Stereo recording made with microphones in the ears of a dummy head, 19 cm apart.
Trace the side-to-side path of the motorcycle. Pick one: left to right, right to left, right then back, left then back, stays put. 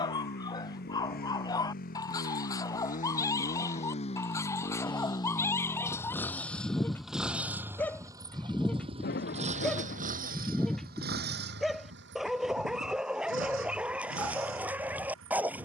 left to right.